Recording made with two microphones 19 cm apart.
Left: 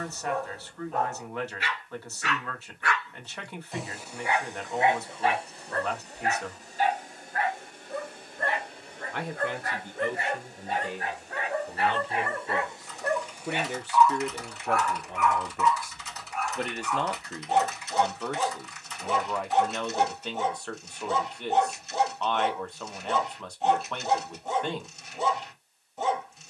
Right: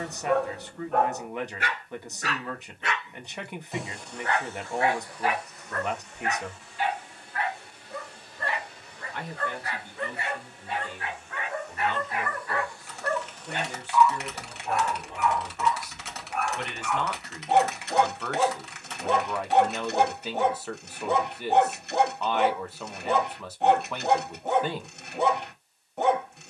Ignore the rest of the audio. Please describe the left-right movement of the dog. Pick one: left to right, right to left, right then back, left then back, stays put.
left then back.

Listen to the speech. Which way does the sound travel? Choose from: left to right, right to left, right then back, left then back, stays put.
left then back.